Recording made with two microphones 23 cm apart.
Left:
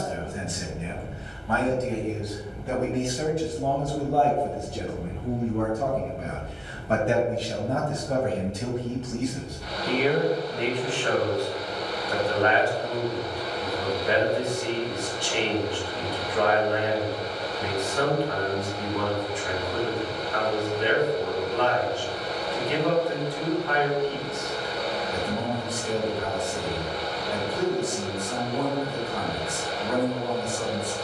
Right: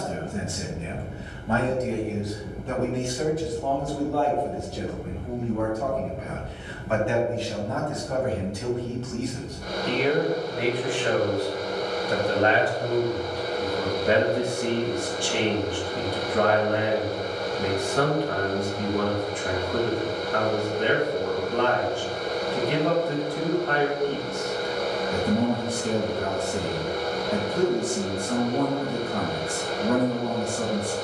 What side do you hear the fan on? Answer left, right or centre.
right.